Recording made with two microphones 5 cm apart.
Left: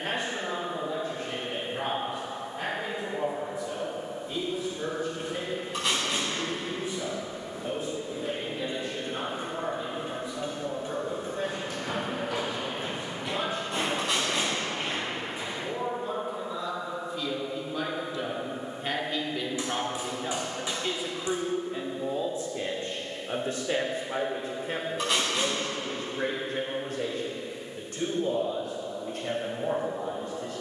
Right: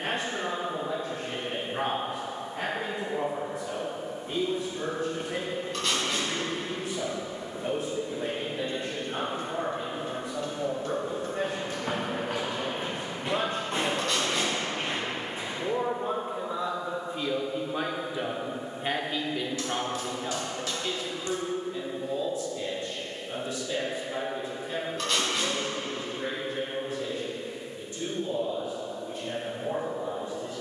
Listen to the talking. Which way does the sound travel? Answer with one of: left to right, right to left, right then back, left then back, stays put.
right to left.